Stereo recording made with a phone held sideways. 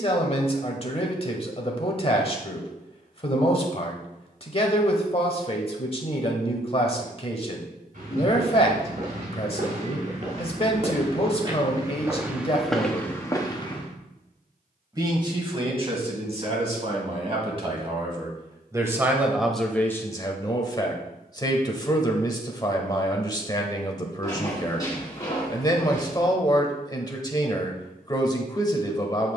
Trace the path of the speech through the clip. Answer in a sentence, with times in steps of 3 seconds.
In this clip you hear the speech on the left from 0 s, on the right from 15 s, in the centre from 18 s and on the left from 21 s.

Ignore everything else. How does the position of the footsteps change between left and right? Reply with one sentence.
You can hear the footsteps go from the right side to the left.